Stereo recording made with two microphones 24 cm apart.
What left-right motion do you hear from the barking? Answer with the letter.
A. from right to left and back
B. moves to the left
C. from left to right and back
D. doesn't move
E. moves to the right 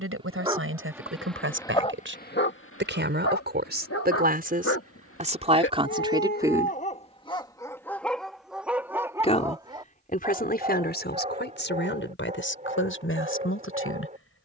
A.